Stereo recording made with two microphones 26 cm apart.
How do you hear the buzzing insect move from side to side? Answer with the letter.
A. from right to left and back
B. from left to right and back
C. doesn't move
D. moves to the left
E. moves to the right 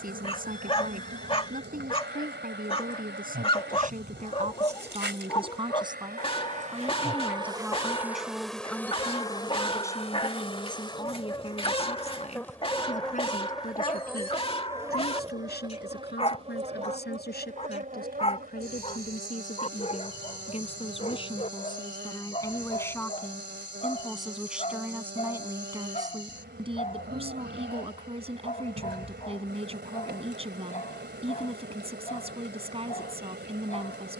A.